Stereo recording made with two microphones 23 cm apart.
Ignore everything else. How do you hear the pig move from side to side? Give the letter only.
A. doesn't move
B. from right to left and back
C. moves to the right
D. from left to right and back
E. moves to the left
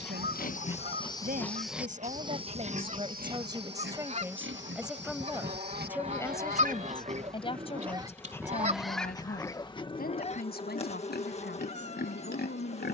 D.